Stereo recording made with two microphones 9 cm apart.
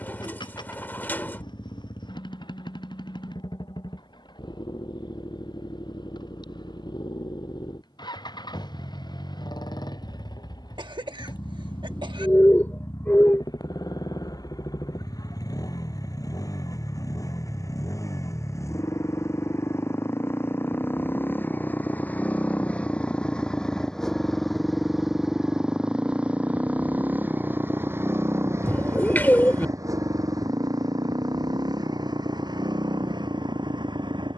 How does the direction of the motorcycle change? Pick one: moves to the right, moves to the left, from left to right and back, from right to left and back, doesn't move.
moves to the right.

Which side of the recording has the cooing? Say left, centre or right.
left.